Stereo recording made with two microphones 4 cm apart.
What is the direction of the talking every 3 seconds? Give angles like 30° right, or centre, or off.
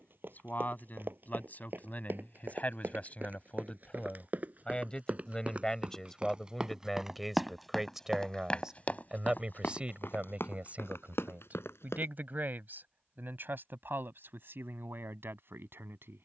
40° left, 30° left, centre, 30° right, 50° right, 60° right.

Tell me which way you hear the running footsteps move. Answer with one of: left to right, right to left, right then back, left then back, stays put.
right to left.